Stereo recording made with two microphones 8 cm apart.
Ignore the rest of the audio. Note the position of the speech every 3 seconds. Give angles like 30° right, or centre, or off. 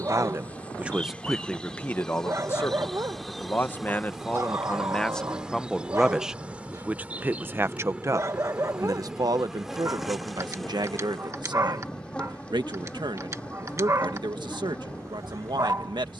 centre, 20° left, 30° right, 70° right, 80° right, 80° right.